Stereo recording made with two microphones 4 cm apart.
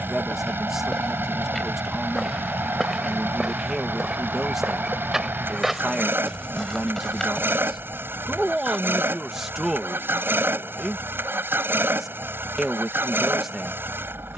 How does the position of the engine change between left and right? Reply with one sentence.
You can hear the engine stay in one place.